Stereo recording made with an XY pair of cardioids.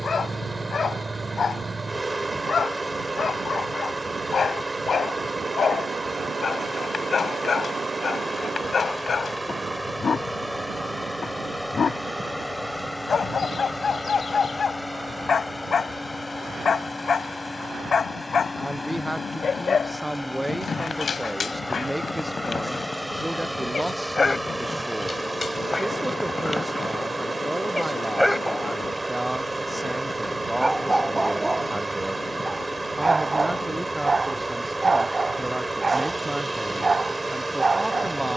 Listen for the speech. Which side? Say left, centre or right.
centre.